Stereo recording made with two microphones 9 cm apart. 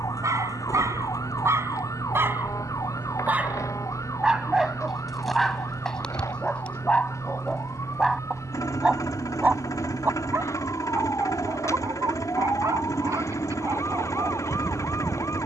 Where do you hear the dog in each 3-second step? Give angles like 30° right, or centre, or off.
30° right, 10° right, 10° left, 30° right, 40° right.